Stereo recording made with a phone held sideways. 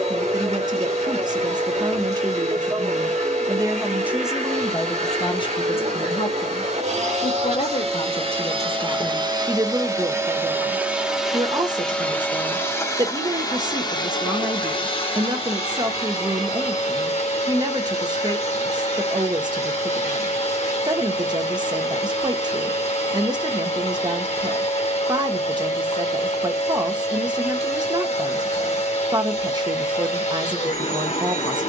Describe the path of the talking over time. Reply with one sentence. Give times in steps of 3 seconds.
You can hear the talking on the right from 0 s, in the centre from 3 s, on the left from 6 s and on the right from 9 s.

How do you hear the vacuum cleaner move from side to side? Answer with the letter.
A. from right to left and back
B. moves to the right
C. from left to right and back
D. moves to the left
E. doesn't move
D.